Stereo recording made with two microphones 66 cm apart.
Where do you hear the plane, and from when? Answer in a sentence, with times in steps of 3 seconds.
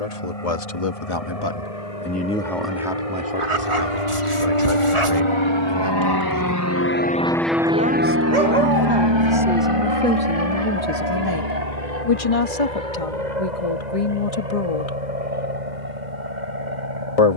You can hear the plane on the left from 0 s, in the centre from 6 s and on the right from 9 s.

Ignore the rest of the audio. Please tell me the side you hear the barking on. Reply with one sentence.
In this clip you hear the barking on the right.